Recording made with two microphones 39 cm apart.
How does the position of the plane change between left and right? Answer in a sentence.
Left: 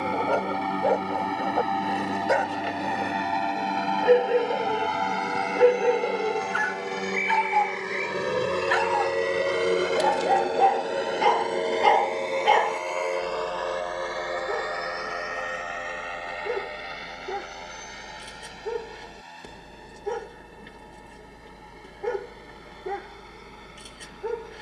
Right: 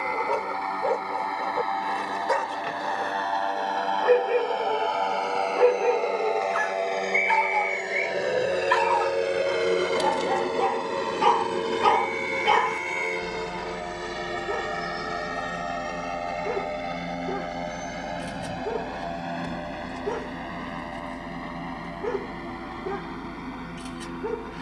You can hear the plane move from left to right.